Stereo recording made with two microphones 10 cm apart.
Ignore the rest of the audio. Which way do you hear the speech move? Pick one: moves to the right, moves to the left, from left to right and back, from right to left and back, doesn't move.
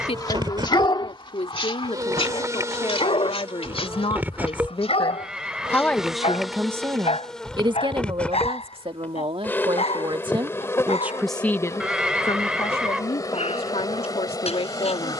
from left to right and back.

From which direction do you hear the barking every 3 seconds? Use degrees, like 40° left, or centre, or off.
50° left, 70° left, 80° left, 80° left, 80° left.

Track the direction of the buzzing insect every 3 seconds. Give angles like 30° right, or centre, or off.
40° right, 20° right, 10° left, 20° left, 30° left.